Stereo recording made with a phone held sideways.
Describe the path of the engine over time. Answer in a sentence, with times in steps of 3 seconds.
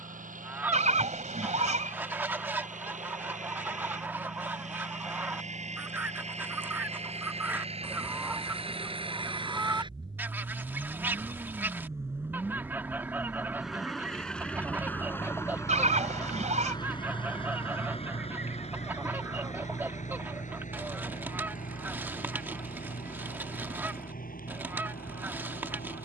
In this clip you hear the engine on the right from 0 s, in the centre from 12 s and on the left from 15 s.